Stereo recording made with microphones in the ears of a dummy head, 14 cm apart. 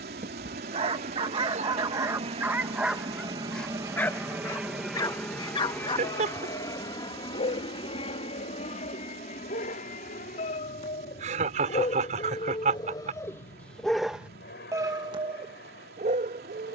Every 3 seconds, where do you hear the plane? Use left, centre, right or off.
right, centre, left, left, left, left.